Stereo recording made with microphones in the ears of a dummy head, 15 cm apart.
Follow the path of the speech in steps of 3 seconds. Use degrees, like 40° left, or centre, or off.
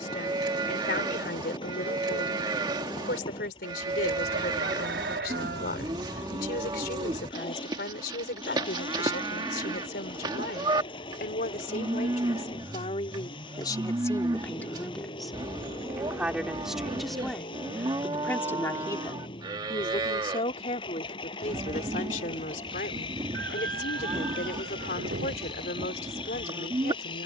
60° left, 60° left, 60° left, 60° left, 30° left, centre, 30° left, 50° left, 50° left.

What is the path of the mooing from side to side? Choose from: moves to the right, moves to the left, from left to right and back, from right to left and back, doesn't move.
doesn't move.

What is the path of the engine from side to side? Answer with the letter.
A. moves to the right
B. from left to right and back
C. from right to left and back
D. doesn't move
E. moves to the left
D.